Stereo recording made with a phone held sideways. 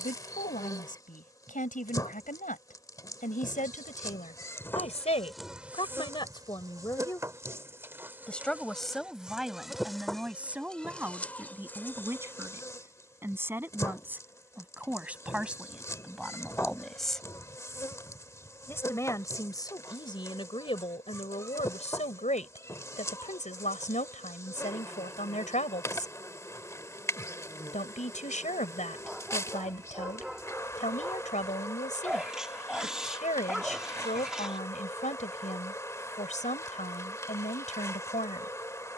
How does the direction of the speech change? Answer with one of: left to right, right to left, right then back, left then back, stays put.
right then back.